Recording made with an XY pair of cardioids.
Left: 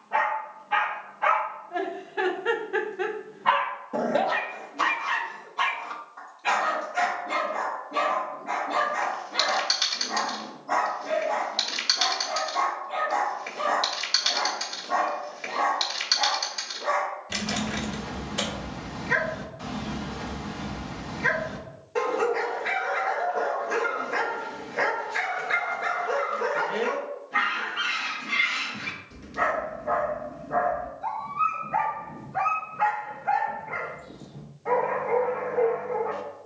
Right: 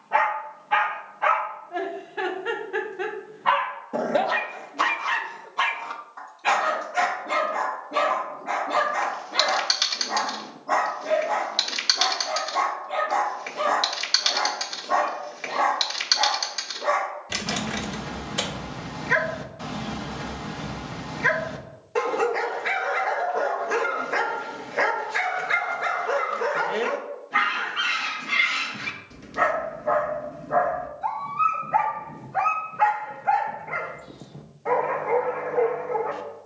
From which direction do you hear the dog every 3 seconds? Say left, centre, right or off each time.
centre, right, right, right, right, right, right, right, right, right, right, right.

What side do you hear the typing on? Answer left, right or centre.
right.